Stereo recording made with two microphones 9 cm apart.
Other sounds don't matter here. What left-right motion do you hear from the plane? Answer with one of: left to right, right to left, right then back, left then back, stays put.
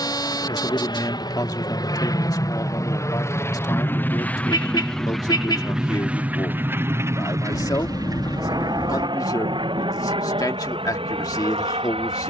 left to right.